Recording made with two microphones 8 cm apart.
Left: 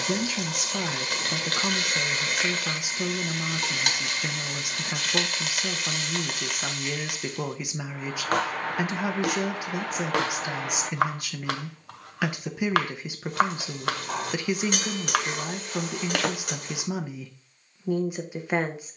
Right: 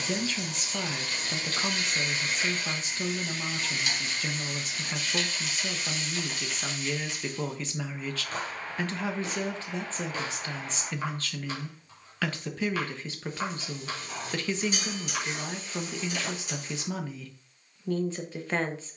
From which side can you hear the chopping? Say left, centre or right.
left.